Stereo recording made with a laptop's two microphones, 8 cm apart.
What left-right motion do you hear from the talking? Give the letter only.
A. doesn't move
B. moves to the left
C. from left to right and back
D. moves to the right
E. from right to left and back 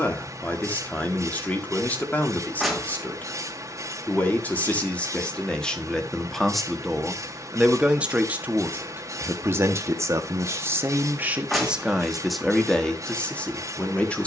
C.